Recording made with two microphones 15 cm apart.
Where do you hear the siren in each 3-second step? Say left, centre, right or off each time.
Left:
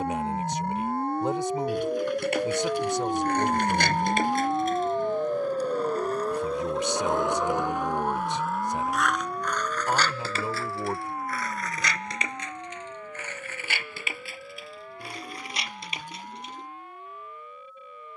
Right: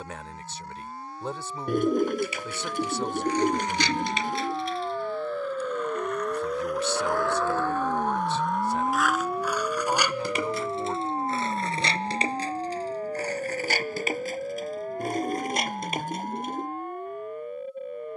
left, left, centre, right, right, right.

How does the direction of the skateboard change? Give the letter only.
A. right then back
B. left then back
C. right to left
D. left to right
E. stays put
D.